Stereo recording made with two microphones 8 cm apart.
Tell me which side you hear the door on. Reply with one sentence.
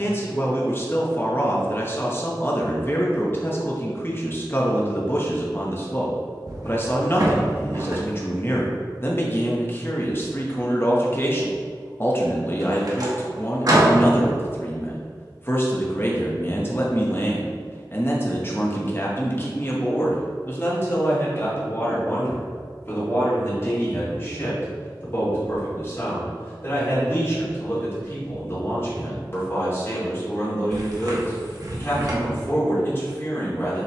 You can hear the door on the right.